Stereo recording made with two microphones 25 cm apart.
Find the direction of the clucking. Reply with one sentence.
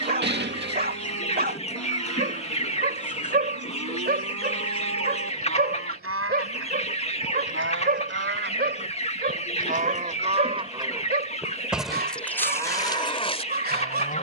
In this clip you hear the clucking on the left.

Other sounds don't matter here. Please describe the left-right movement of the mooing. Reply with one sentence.
In this clip you hear the mooing go from the right side to the left.